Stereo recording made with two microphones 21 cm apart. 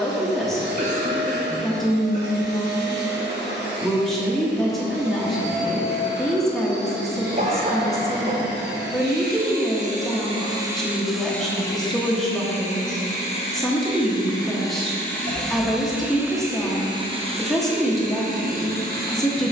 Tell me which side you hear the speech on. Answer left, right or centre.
centre.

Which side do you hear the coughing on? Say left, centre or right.
right.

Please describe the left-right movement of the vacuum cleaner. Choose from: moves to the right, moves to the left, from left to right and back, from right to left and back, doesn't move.
from right to left and back.